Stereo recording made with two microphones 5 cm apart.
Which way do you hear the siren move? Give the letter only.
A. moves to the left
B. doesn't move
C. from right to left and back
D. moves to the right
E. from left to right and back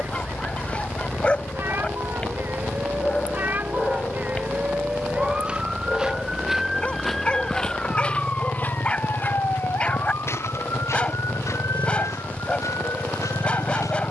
A.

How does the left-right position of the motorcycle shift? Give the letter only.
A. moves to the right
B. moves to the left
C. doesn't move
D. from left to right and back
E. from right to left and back
C.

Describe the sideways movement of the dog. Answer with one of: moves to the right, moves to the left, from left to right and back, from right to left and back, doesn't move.
doesn't move.